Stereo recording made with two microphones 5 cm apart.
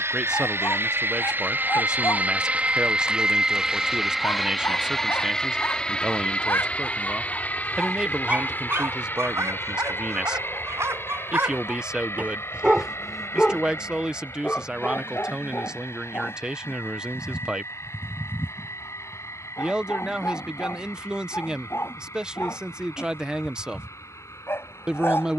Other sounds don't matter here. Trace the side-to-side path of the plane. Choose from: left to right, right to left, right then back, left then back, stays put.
right to left.